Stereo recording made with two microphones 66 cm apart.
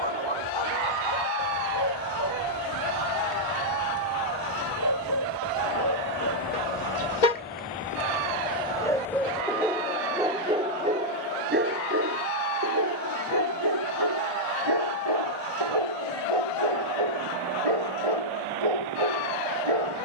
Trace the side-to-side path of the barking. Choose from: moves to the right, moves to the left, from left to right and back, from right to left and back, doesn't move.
moves to the right.